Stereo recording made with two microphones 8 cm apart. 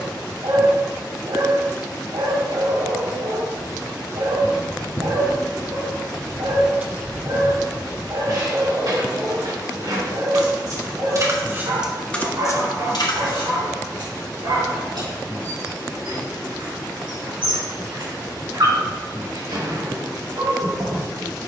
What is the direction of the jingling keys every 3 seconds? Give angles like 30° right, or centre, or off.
off, 50° left, 30° right, 50° right, 50° left, off, off.